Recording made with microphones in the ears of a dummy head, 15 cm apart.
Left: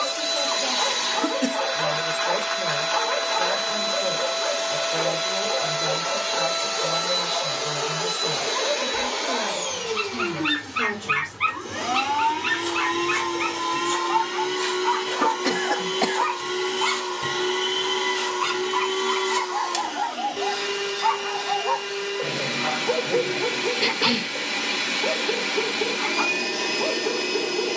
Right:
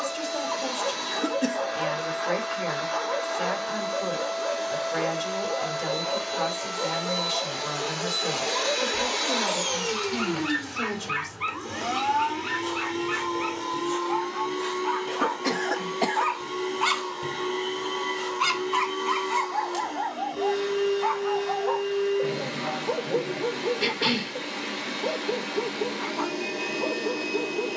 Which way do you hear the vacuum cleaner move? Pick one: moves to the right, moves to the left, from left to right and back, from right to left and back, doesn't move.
from left to right and back.